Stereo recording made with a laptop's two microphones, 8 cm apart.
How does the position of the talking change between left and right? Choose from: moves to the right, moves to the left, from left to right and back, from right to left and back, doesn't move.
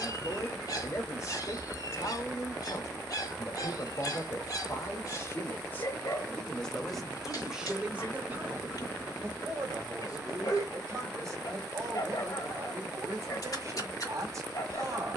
moves to the right.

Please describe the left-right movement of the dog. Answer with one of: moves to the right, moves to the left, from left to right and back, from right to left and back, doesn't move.
doesn't move.